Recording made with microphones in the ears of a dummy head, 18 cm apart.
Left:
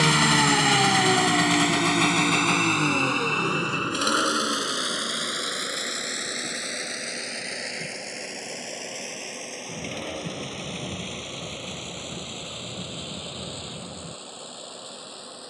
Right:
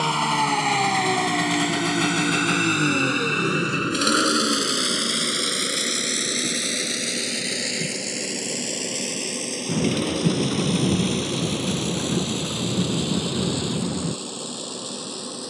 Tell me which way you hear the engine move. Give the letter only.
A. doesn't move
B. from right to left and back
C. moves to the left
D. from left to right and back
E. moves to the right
E.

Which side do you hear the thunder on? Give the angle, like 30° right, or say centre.
80° right.